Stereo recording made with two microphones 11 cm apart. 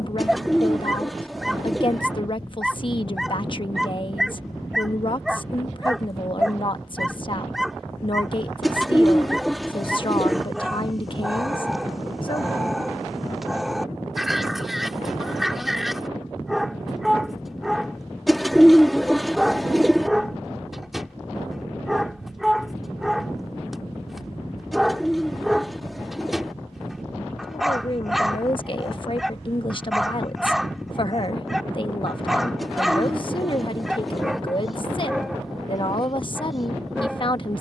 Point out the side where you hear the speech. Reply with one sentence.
You can hear the speech on the left.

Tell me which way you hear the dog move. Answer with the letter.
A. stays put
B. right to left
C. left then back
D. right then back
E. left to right
A.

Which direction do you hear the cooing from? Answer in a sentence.
In this clip you hear the cooing in the centre.